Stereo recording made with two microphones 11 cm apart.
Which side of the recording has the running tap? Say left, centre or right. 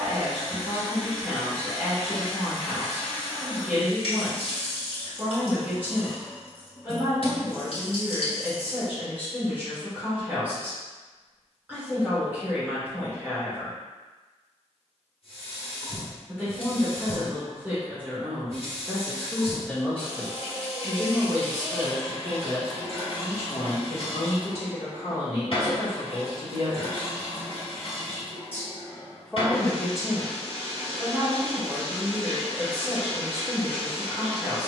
left.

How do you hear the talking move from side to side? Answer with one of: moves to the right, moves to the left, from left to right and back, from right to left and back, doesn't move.
from right to left and back.